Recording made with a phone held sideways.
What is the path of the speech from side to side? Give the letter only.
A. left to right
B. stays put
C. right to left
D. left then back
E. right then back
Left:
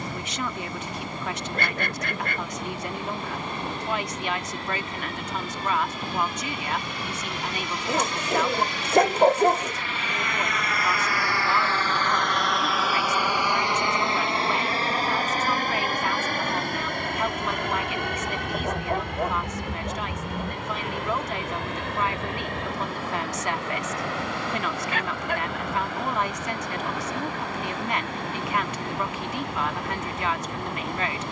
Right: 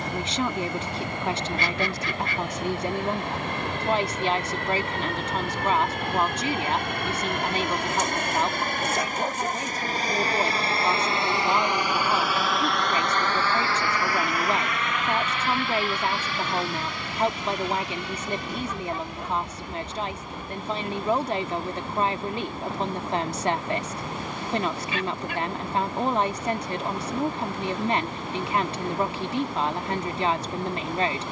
B.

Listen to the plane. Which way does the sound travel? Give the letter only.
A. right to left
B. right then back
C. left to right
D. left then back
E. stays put
A.